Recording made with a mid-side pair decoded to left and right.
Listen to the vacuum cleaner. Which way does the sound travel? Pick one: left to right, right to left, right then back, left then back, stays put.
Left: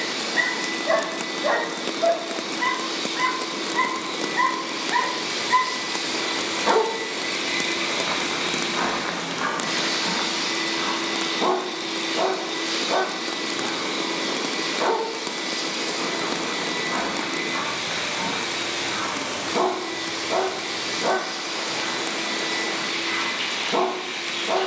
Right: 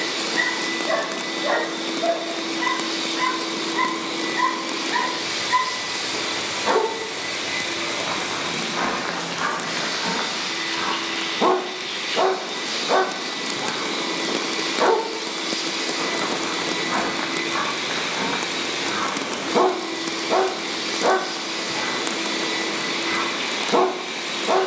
left then back.